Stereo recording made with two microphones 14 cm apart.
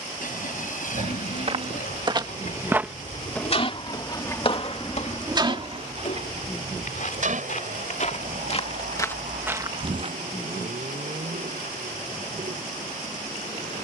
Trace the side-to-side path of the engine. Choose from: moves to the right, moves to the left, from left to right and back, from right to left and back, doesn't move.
moves to the right.